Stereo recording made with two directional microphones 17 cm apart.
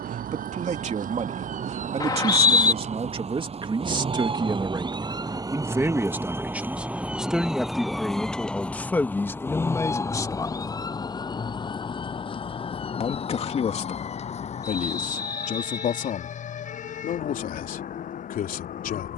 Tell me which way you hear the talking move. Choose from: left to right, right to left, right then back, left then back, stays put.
right to left.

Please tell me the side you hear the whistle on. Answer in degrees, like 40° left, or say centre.
20° left.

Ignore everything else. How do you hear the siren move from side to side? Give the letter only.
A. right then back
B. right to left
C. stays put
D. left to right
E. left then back
B.